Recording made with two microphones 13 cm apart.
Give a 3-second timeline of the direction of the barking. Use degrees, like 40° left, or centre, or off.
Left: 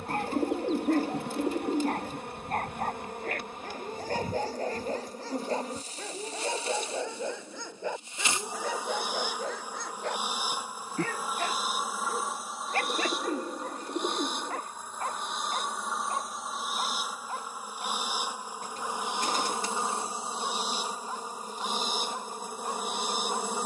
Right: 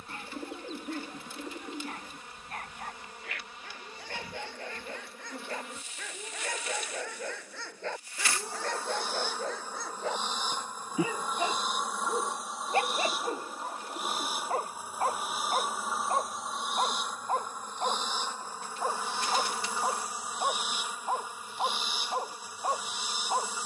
50° left, 40° left, 20° left, centre, 20° right, 40° right, 40° right, 40° right.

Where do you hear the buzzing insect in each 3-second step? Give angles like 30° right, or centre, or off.
60° left, 40° left, 30° left, 10° left, centre, centre, 20° left, 50° left.